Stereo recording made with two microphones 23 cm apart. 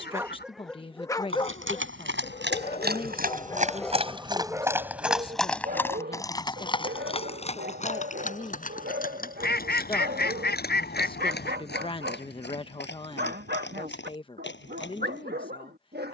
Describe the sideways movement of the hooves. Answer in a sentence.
You can hear the hooves move from right to left.